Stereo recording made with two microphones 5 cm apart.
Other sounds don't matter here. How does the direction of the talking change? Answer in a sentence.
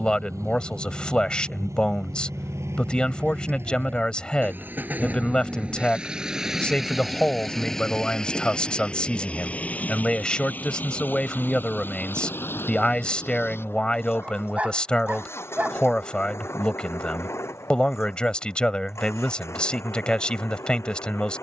You can hear the talking stay put.